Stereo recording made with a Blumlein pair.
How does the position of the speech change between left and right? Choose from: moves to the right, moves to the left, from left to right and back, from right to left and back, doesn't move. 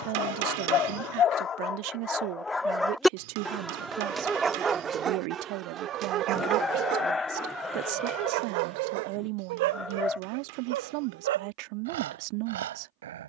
doesn't move.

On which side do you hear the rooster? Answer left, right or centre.
centre.